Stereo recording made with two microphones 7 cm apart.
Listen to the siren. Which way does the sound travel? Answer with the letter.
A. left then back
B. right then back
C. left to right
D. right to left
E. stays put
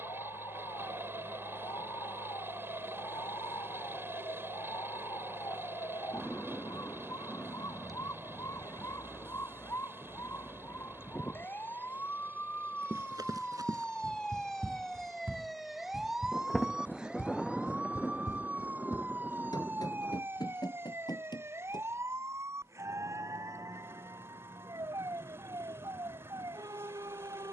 C.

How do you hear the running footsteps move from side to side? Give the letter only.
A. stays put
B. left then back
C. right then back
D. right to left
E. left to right
D.